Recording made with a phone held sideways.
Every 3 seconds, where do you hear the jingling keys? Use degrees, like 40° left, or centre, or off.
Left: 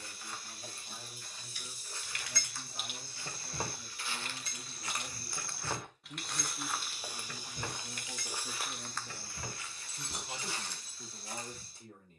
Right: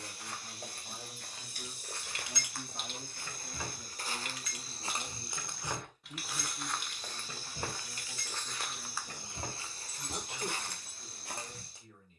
20° right, 30° left, 20° right, 40° right.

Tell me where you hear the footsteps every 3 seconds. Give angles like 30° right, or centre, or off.
60° right, 40° right, 10° left, 50° right.